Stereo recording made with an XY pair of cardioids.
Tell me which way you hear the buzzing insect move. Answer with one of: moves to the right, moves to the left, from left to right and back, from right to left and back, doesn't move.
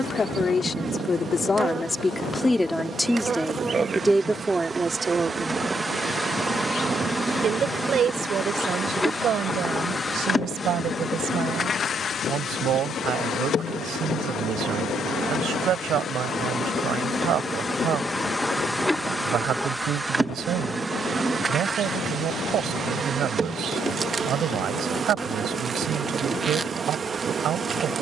from right to left and back.